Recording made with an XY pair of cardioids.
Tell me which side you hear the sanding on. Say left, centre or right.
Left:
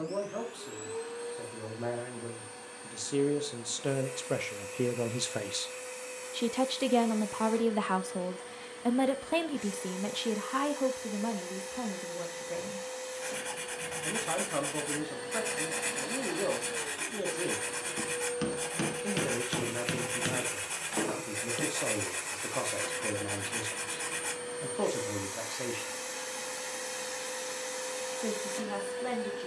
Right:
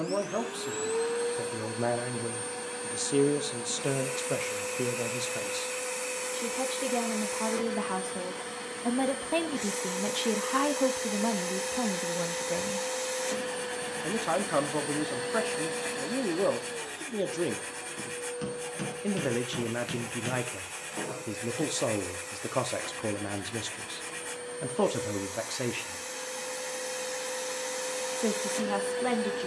left.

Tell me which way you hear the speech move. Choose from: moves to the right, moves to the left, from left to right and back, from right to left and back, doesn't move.
from right to left and back.